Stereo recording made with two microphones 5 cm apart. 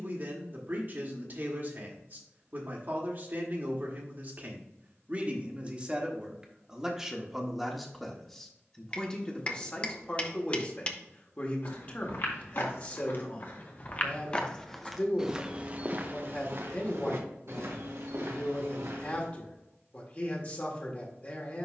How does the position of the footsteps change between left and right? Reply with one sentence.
You can hear the footsteps go from the left side to the right.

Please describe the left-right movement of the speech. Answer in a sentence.
In this clip you hear the speech travel towards the left.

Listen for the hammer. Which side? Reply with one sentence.
In this clip you hear the hammer on the left.